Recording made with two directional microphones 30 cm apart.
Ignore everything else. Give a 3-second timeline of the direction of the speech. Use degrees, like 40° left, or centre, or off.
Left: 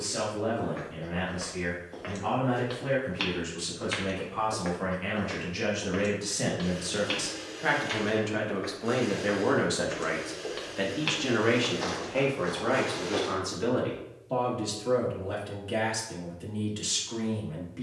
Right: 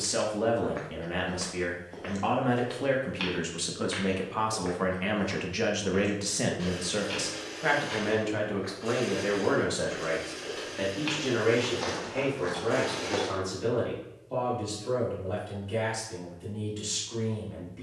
60° right, 40° right, 10° right, 30° left, 40° left, 50° left.